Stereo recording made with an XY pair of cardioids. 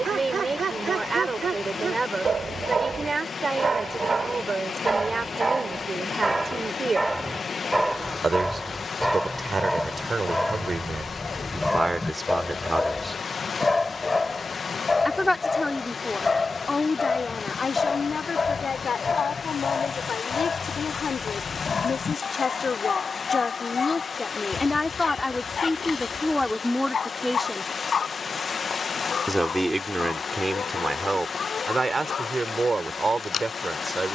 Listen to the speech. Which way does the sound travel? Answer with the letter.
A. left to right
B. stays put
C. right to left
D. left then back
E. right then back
D.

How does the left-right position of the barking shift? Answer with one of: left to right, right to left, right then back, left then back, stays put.
right to left.